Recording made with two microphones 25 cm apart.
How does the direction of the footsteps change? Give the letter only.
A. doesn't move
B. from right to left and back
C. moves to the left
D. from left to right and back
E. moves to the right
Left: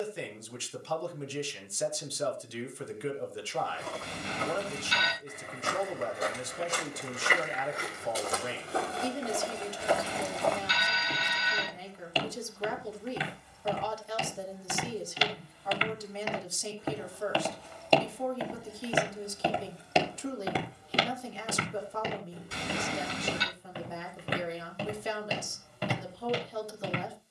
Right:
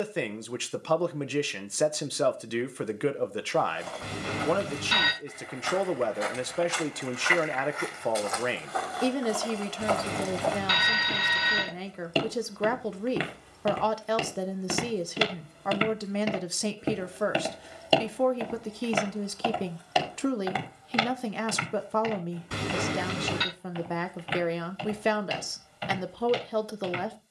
D.